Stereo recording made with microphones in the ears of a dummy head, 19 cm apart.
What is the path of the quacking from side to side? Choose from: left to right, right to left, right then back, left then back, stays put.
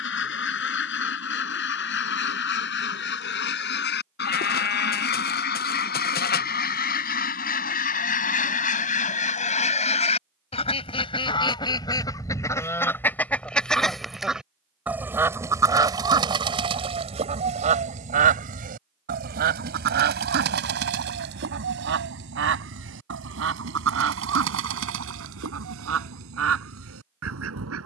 left to right.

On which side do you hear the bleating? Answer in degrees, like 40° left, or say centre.
50° left.